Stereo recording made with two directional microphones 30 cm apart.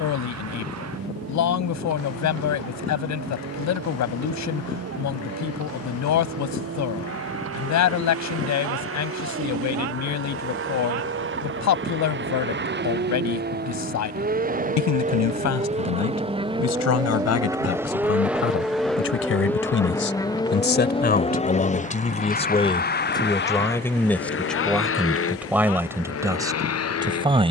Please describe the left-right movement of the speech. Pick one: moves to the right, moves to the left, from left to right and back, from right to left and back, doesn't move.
moves to the right.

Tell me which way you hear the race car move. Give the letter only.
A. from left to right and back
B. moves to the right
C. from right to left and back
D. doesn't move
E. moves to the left
E.